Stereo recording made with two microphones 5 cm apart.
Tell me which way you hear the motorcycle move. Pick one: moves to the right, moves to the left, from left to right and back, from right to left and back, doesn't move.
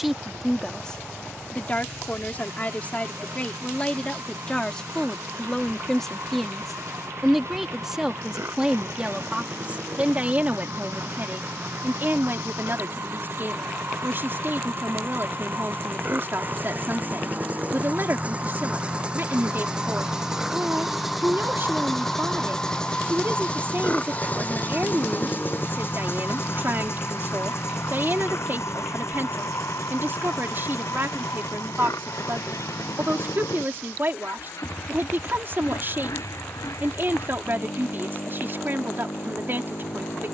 moves to the left.